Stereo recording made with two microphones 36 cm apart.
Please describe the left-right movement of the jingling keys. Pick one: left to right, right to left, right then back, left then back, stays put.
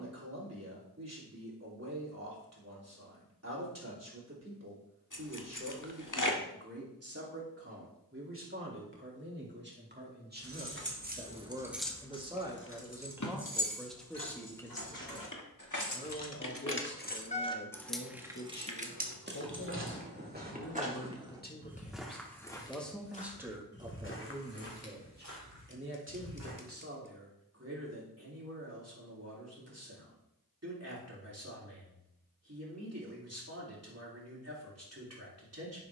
left then back.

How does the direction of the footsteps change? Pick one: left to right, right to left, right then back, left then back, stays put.
right to left.